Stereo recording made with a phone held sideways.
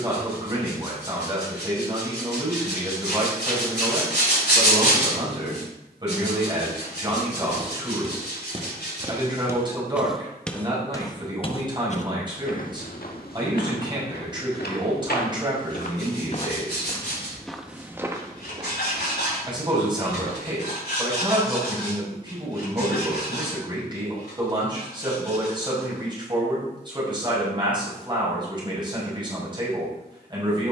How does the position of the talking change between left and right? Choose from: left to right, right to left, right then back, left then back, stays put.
stays put.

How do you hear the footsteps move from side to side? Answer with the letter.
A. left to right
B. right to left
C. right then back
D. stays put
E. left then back
E.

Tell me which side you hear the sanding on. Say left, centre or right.
left.